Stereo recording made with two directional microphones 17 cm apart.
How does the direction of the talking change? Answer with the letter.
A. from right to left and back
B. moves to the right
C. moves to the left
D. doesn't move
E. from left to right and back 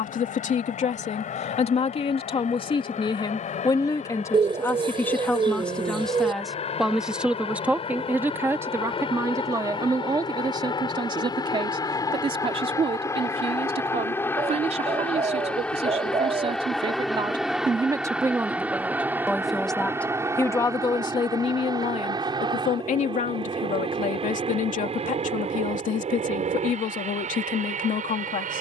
E.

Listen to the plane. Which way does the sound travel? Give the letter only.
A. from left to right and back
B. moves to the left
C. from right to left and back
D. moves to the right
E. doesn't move
D.